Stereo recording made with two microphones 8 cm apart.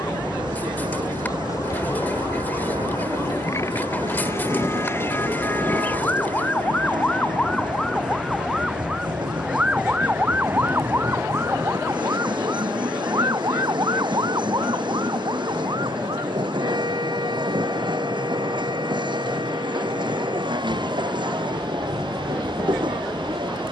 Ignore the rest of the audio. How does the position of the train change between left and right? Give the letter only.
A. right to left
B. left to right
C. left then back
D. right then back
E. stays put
E.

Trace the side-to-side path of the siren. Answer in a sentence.
In this clip you hear the siren travel towards the right.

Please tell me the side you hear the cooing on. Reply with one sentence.
You can hear the cooing on the left.